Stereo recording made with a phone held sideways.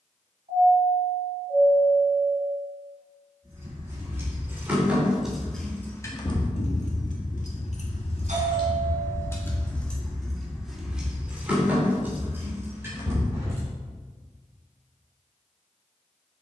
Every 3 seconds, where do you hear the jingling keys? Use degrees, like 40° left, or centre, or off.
off, 10° right, 50° left, centre, 20° right, off.